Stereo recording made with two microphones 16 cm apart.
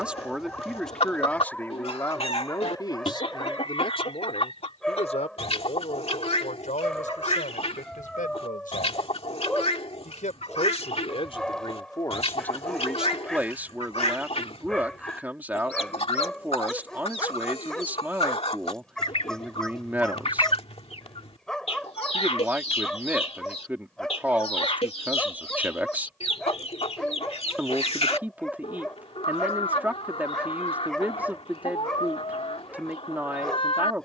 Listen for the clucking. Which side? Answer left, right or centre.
left.